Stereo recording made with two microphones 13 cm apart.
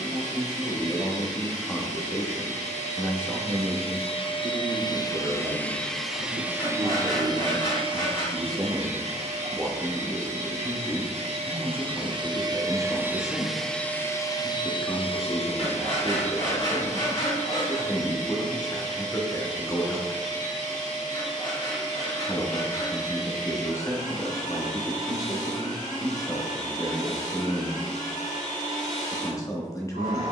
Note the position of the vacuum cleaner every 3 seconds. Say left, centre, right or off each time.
left, left, right, right, centre, left, left, left, left, left.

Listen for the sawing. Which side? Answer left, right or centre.
left.